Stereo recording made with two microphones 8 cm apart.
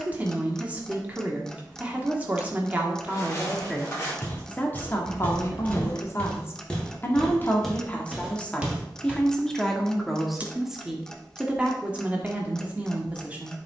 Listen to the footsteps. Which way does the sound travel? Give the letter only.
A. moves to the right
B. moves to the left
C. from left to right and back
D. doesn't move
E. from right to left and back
A.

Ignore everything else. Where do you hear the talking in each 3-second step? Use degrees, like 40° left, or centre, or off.
20° right, 20° left, 20° left, centre, 20° right.